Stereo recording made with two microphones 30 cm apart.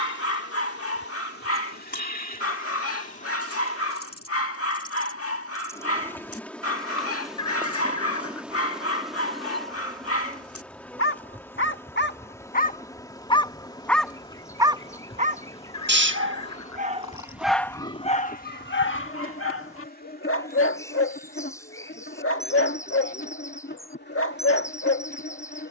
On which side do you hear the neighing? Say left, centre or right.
left.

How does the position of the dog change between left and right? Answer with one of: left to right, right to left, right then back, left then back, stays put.
right then back.